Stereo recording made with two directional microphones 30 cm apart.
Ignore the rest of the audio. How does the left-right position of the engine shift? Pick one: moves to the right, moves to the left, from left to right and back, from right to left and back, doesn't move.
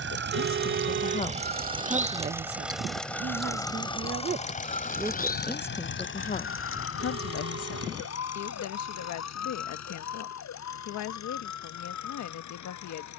moves to the left.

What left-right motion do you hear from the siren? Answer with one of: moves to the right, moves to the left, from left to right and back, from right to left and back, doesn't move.
moves to the left.